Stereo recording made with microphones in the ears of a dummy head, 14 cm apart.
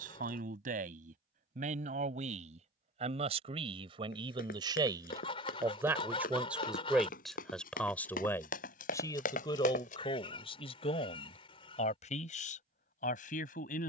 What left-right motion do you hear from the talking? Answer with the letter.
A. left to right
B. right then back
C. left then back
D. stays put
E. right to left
E.